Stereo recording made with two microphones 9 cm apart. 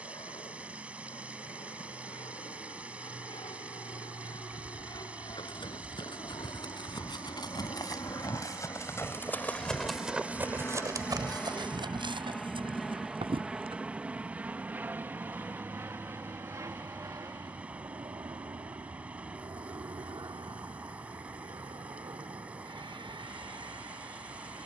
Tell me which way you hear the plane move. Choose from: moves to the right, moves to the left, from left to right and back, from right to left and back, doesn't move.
moves to the right.